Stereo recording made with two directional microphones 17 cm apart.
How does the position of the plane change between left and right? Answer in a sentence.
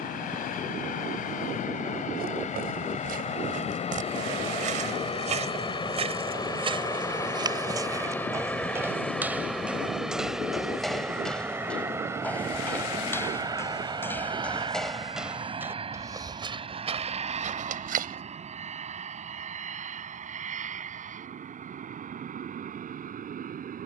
You can hear the plane move to the right.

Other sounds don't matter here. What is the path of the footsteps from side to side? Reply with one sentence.
You can hear the footsteps move from right to left and back again.